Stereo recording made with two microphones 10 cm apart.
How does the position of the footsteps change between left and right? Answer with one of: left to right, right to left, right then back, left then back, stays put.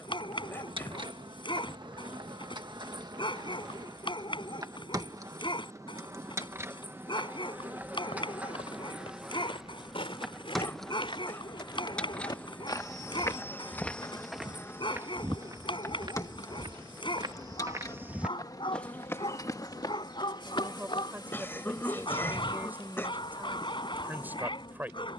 right then back.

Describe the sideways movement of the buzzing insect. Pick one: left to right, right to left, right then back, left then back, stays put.
right to left.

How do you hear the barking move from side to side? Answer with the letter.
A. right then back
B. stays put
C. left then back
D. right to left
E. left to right
B.